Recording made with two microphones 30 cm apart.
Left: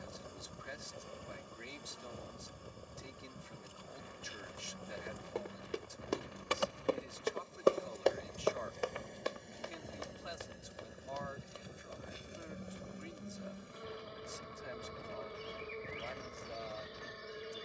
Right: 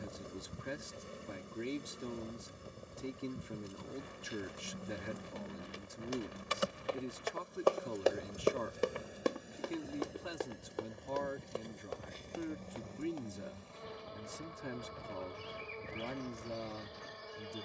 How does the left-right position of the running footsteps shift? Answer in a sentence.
In this clip you hear the running footsteps go from the left side to the right.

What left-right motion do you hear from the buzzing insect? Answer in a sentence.
In this clip you hear the buzzing insect go from the right side to the left.